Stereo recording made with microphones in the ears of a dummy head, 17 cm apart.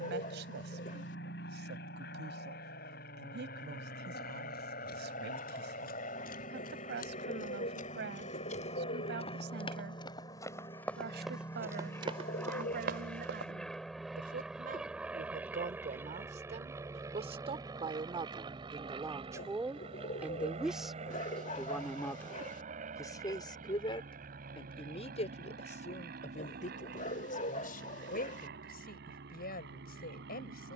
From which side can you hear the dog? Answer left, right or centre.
left.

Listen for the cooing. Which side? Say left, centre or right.
left.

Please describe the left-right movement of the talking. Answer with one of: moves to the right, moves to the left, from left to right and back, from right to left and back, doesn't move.
moves to the left.